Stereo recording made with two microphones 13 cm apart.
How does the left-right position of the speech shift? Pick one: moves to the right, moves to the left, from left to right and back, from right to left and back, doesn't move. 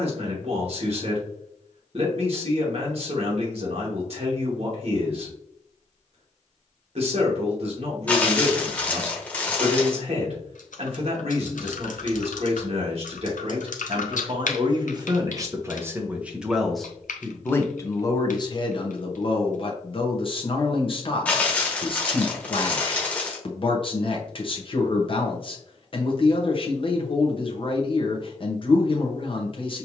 moves to the left.